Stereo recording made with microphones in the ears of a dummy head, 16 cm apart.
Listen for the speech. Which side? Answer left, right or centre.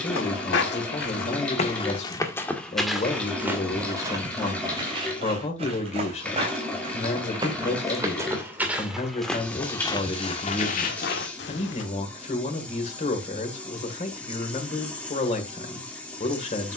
left.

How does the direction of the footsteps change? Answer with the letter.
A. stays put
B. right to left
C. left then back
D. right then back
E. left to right
D.